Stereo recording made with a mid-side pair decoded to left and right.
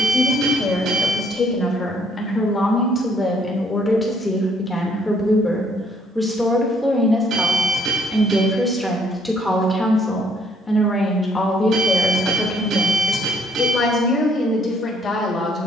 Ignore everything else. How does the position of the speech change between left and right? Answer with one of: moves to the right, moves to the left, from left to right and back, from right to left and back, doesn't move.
from left to right and back.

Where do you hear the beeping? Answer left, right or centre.
right.